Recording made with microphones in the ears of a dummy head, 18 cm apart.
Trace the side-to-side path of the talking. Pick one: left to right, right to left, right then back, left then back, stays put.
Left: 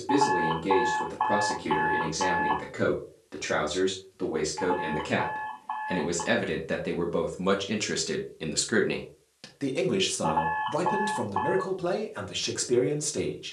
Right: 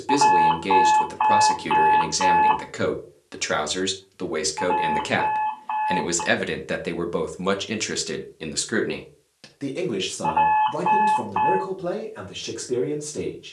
right to left.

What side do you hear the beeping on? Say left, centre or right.
right.